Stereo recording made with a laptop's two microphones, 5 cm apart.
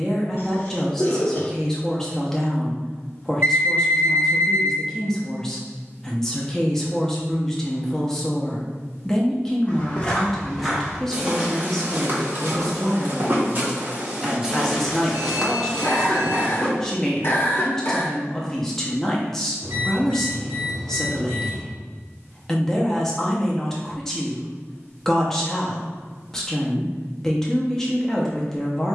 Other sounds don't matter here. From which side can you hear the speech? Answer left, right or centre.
centre.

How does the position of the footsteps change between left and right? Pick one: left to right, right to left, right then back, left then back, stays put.
right then back.